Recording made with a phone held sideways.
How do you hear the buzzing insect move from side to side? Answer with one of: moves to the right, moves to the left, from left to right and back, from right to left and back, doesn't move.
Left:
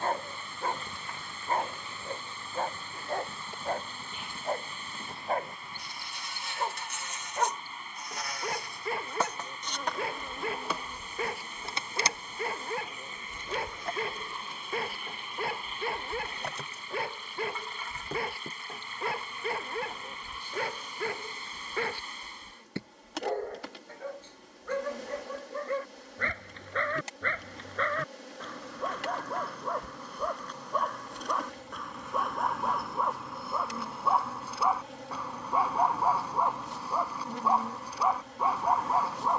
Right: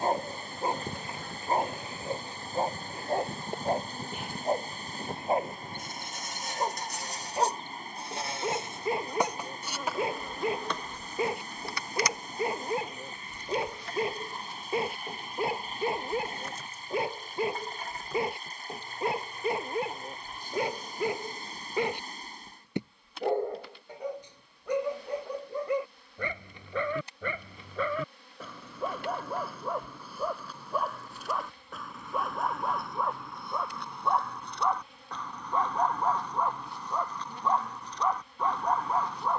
moves to the left.